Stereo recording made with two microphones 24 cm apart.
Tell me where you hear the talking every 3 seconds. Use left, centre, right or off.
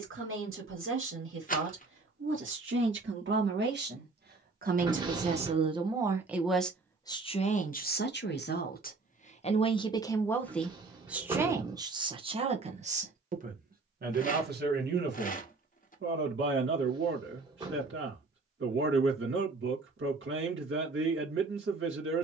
right, right, left, centre, right, right, right, right.